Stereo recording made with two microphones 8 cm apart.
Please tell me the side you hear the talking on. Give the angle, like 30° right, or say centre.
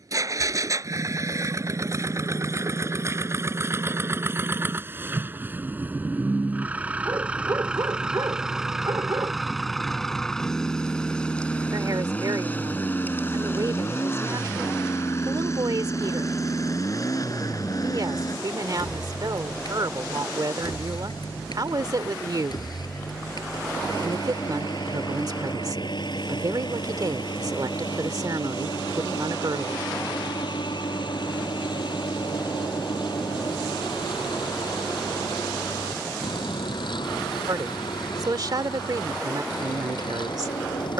60° right.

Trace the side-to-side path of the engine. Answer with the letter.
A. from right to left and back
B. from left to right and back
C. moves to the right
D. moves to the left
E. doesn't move
D.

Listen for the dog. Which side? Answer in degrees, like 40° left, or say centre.
50° right.